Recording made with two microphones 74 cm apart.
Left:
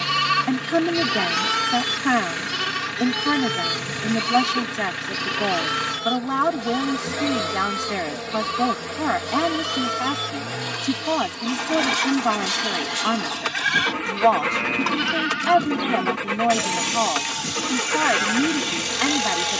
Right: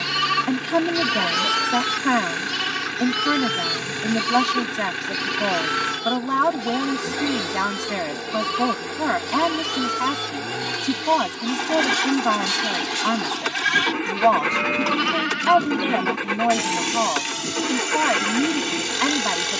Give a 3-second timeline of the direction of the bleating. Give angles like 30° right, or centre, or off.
20° right, 50° right, 60° right, 50° right, 40° right, 10° left, 30° left.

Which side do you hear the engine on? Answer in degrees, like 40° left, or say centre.
20° left.